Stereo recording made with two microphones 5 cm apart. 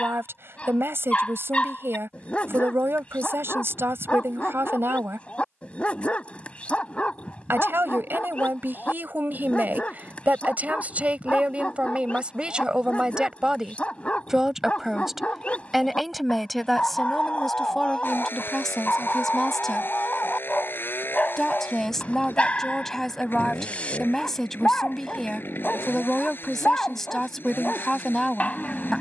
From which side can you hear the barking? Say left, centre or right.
left.